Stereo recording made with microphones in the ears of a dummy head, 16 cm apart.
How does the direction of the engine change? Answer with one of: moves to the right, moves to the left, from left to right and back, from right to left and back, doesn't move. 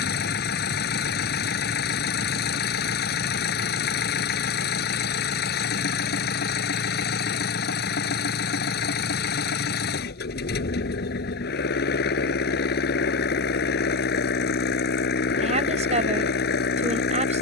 doesn't move.